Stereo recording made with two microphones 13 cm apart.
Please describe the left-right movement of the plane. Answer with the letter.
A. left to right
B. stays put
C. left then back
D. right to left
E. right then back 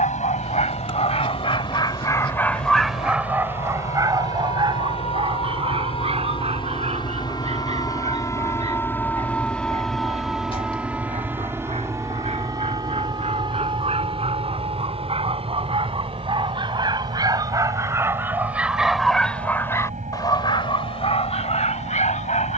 A.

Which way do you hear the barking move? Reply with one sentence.
In this clip you hear the barking go right and come back.